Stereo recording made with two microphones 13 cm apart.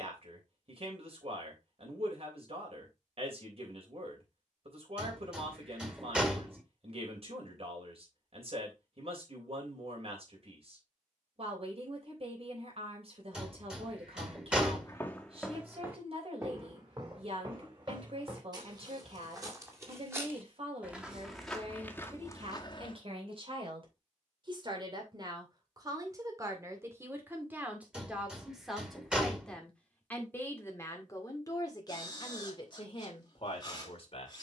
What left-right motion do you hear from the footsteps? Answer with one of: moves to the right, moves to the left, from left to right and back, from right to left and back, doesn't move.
from left to right and back.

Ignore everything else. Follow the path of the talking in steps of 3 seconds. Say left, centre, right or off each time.
right, right, right, right, right, right, right, right, right, centre, left, left.